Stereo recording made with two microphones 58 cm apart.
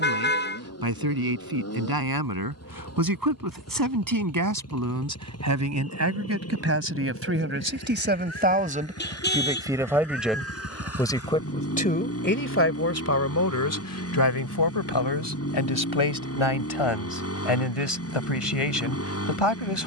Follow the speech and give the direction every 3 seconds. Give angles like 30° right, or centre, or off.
40° right, 30° right, 20° right, centre, 30° left, 50° left, 60° left.